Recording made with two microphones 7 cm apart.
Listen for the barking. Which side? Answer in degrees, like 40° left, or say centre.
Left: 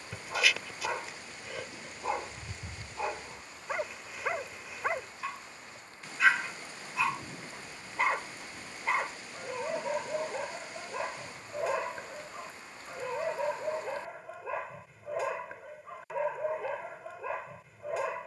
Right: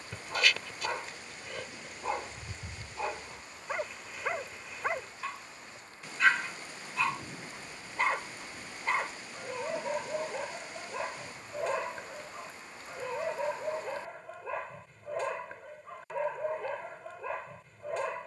centre.